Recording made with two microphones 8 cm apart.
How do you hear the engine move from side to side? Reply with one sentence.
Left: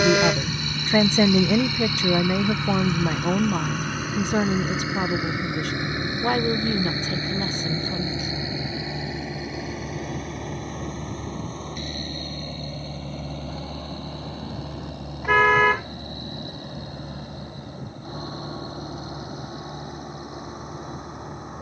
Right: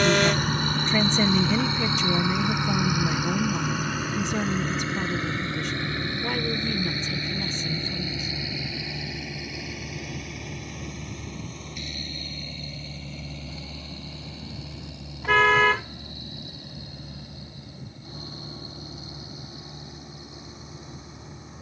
You can hear the engine travel towards the left.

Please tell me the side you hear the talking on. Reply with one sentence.
In this clip you hear the talking on the left.